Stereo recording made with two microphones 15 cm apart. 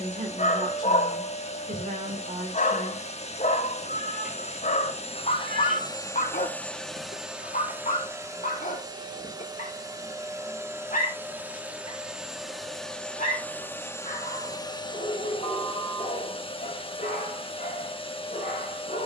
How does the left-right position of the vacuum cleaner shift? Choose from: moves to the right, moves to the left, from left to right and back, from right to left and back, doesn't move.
from left to right and back.